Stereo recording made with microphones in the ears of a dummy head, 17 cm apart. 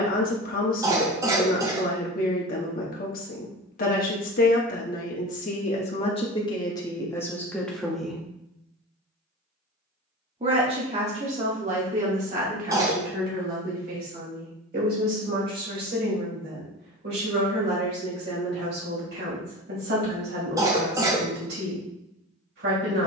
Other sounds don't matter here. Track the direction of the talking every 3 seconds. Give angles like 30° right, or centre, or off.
50° left, 40° left, 10° left, 40° right, 50° right, 60° right, 60° right, 60° right.